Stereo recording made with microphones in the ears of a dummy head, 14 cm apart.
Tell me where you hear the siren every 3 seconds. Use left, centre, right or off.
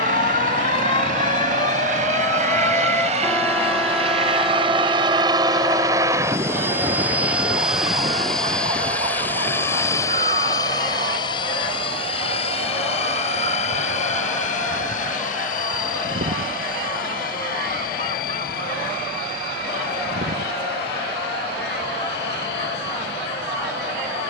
left, centre, right, right, right, right, right, right.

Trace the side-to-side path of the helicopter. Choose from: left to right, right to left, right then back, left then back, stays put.
right to left.